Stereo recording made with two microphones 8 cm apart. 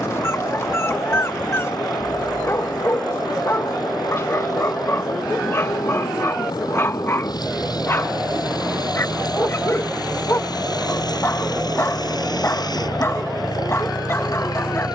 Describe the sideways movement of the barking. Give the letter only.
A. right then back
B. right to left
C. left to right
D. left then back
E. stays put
E.